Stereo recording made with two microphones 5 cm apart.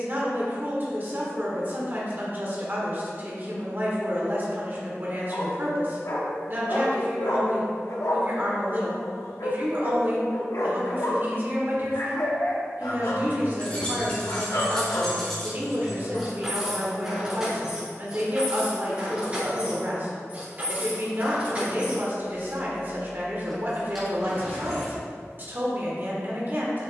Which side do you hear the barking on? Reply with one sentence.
You can hear the barking on the left.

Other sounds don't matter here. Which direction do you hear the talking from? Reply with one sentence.
In this clip you hear the talking on the right.